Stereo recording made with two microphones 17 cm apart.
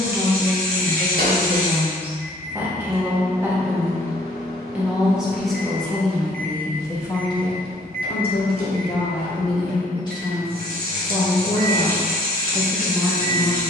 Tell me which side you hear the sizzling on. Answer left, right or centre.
right.